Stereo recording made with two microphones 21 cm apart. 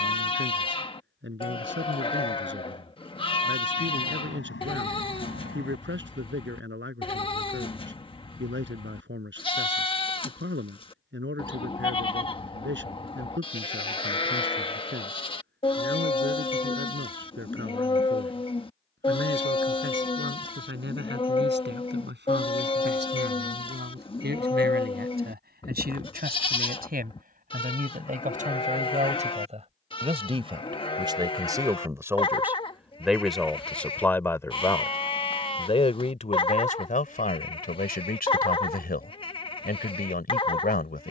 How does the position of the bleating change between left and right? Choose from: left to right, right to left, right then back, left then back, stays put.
stays put.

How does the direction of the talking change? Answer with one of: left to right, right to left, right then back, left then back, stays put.
right to left.